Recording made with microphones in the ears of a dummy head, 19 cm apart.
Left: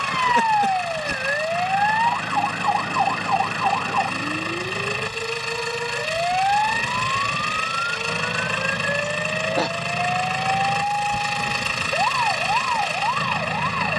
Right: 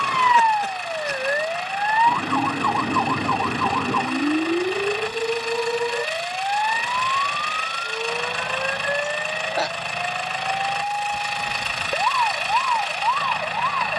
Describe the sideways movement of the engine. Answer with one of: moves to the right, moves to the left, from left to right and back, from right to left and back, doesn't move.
doesn't move.